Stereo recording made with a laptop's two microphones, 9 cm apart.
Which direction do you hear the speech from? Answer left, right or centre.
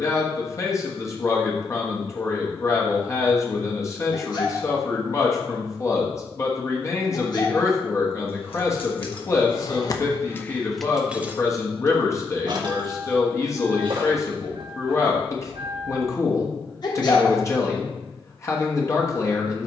left.